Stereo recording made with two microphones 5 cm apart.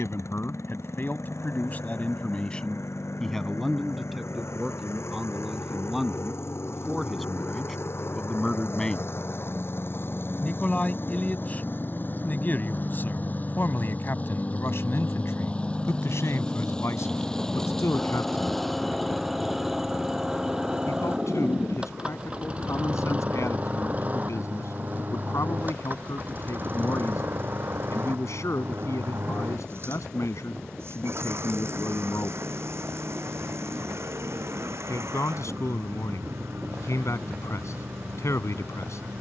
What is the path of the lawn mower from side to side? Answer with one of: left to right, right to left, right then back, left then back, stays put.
left to right.